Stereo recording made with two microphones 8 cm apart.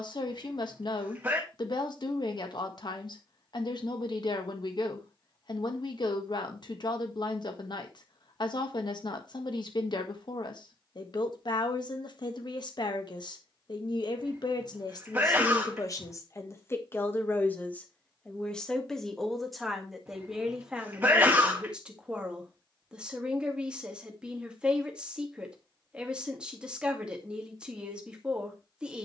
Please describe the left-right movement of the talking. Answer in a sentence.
You can hear the talking move to the right.